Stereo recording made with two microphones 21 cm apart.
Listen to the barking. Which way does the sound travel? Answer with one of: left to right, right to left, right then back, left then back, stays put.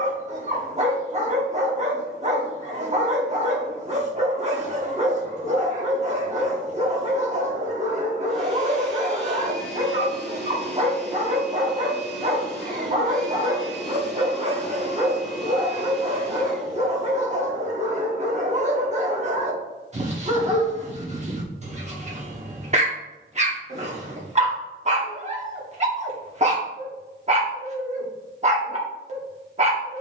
stays put.